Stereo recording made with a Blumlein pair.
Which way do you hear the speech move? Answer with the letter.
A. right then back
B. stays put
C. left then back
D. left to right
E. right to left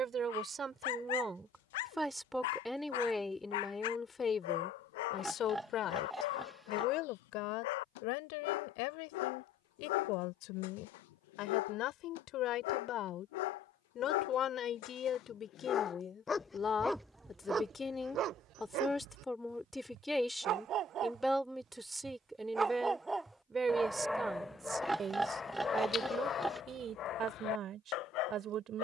C.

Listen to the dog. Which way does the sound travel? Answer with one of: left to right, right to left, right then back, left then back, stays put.
right then back.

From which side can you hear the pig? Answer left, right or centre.
centre.